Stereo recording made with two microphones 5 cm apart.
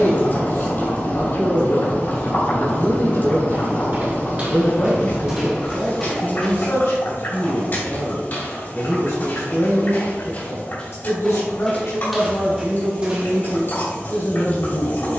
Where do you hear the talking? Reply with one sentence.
In this clip you hear the talking on the left.